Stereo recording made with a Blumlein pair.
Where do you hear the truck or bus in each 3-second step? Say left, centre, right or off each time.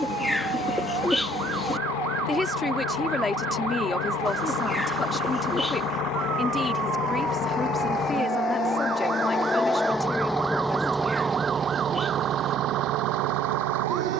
left, left, left, centre, right.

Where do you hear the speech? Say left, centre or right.
centre.